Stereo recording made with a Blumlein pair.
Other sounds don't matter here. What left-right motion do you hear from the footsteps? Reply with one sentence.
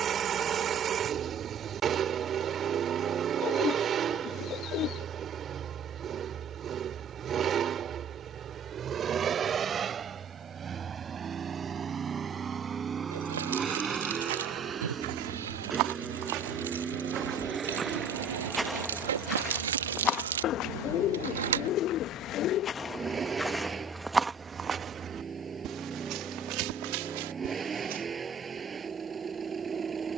You can hear the footsteps go left and come back.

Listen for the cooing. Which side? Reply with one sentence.
You can hear the cooing on the left.